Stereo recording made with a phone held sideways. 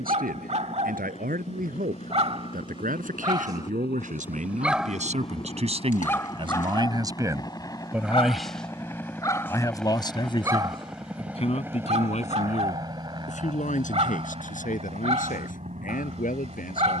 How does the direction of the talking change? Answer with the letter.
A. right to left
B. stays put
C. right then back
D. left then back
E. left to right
A.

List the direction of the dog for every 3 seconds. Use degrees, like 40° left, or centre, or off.
50° right, 10° right, 30° left, 20° right, 50° right, 50° right.